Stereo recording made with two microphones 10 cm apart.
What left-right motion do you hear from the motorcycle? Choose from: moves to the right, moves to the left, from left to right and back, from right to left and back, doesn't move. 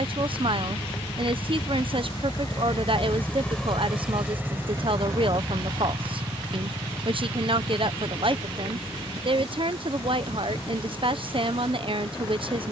moves to the right.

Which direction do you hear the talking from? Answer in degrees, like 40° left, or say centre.
60° right.